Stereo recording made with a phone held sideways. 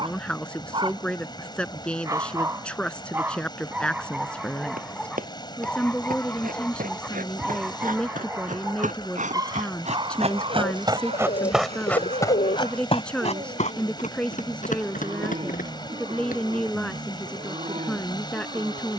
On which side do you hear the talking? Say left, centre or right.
centre.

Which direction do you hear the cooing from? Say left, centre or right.
left.